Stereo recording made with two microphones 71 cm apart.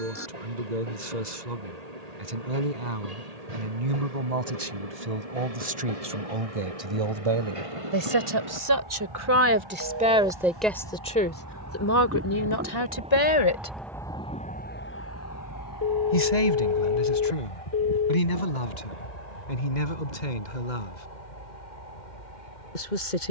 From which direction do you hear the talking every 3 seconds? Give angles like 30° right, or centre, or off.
70° right, 60° right, 40° right, centre, 30° left, 60° left, 70° left, 80° left.